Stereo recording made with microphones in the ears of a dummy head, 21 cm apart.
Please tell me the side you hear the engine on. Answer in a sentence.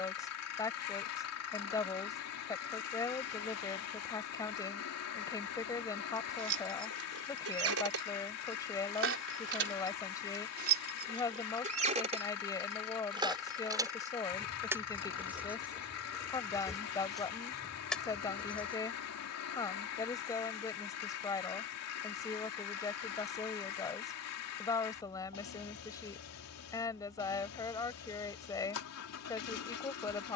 You can hear the engine on the left.